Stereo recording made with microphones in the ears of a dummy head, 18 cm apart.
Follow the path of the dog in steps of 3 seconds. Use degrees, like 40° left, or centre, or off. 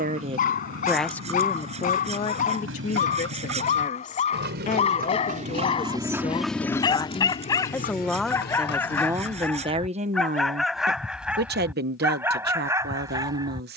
40° left, 30° left, 20° left, centre, 20° right.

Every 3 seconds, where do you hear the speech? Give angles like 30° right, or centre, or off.
10° left, 40° left, 10° left, 40° right, 50° right.